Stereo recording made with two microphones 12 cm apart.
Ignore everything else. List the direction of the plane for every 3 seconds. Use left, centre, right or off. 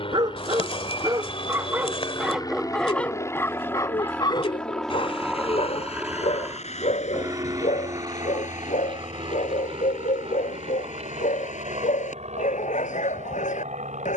left, centre, right, right, right.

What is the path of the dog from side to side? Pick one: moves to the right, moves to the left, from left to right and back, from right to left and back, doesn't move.
moves to the left.